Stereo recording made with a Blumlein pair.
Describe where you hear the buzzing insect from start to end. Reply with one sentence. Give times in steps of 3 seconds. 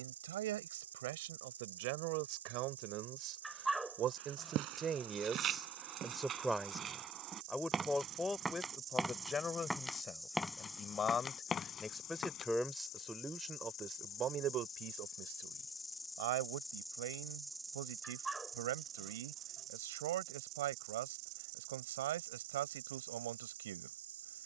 In this clip you hear the buzzing insect on the right from 0 s, in the centre from 9 s, on the left from 12 s, in the centre from 15 s and on the right from 18 s.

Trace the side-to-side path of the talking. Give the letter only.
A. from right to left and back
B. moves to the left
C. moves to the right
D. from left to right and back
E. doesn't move
A.